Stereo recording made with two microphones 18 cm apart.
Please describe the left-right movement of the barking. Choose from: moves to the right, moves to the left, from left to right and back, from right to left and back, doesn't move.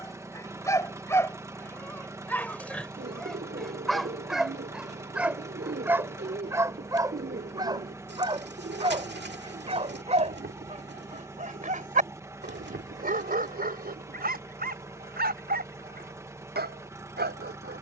moves to the right.